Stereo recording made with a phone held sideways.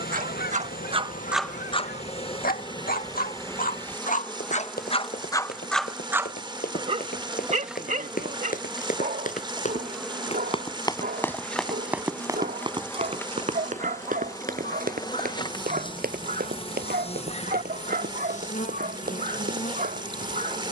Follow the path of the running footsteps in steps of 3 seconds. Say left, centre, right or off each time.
off, left, left, left, right, right, right.